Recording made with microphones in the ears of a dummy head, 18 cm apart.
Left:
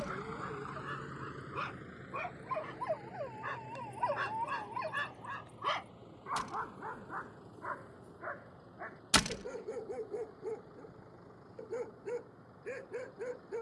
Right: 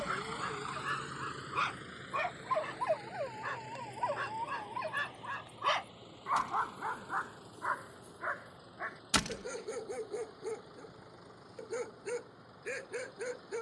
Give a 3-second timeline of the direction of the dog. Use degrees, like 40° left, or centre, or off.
50° right, 20° right, 60° right, 80° right, 80° right.